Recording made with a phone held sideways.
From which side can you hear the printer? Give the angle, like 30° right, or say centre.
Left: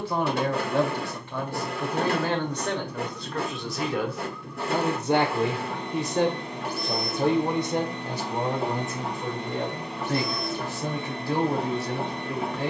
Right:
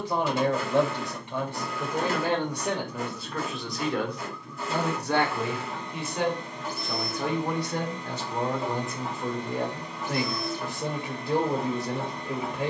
60° left.